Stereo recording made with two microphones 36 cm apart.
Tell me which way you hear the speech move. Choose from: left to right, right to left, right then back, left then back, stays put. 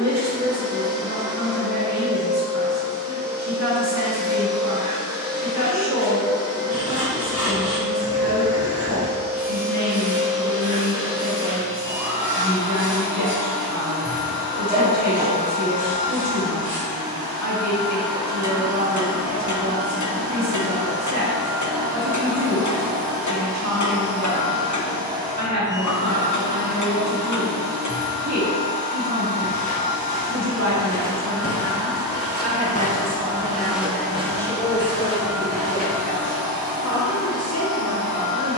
right to left.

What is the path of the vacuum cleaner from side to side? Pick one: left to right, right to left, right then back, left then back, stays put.
stays put.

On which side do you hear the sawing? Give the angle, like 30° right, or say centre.
20° right.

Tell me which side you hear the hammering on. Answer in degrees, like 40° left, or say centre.
50° left.